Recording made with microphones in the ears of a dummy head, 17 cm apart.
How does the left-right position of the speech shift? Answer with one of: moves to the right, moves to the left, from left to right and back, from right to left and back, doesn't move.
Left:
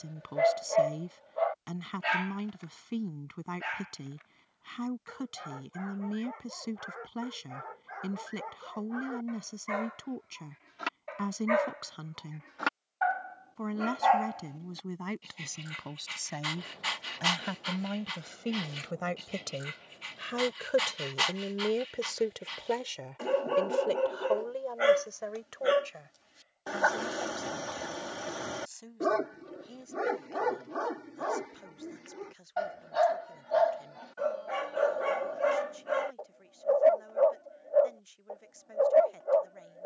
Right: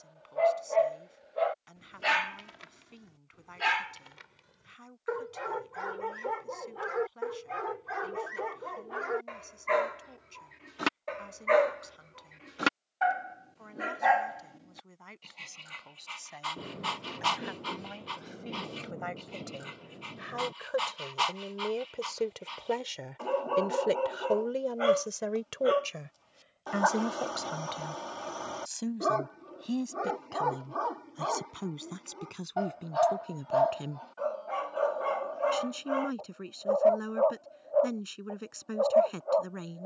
moves to the right.